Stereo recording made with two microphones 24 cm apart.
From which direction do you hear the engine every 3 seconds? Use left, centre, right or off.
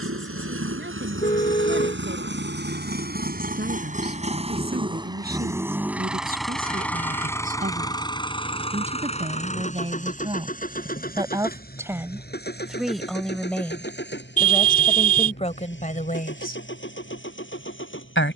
right, right, centre, left, left, left.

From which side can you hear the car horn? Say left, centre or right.
left.